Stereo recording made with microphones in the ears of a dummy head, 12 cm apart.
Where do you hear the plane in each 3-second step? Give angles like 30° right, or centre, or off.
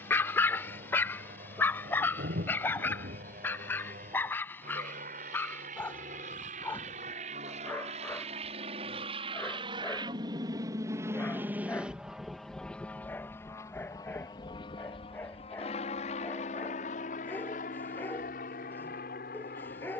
70° right, 70° right, 50° right, 30° right, 20° left, 50° left, 60° left.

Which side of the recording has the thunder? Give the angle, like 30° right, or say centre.
80° right.